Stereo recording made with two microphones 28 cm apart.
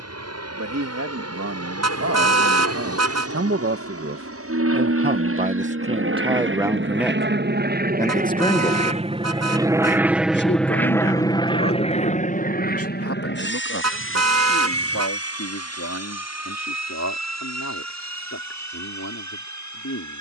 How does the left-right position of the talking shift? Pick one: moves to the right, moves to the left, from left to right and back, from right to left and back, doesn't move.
moves to the left.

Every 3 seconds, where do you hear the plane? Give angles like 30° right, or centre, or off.
70° right, 60° right, 40° right, centre, 40° left, 60° left, 70° left.